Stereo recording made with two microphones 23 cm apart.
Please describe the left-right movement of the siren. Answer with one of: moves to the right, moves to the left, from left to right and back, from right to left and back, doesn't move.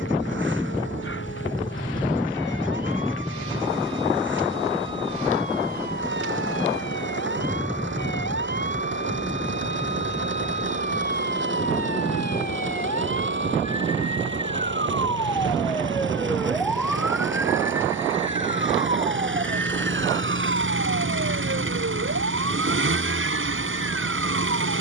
moves to the right.